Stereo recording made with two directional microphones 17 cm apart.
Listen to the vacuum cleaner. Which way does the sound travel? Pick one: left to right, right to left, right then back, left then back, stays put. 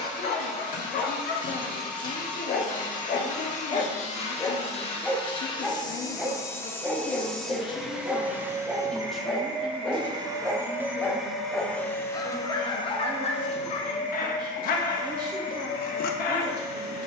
right then back.